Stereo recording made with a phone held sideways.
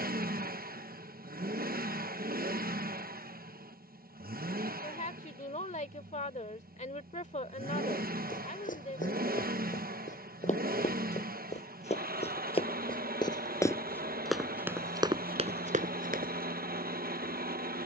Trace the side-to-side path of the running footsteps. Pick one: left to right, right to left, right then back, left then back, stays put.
left to right.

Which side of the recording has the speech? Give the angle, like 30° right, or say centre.
50° left.